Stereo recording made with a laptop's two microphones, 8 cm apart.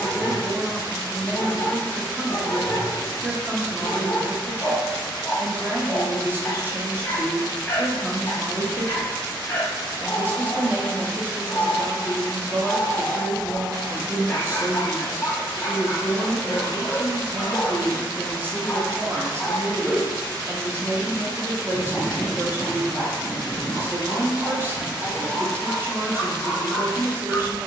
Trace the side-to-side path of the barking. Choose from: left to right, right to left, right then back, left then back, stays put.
left to right.